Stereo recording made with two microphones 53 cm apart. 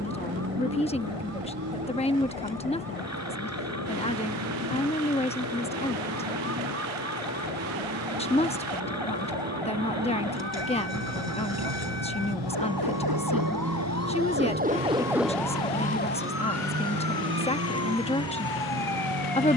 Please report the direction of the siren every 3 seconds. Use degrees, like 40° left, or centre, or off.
80° right, 80° right, 70° right, 60° right, 30° right, 20° left, 60° left.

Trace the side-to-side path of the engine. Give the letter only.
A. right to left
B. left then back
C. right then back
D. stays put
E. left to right
D.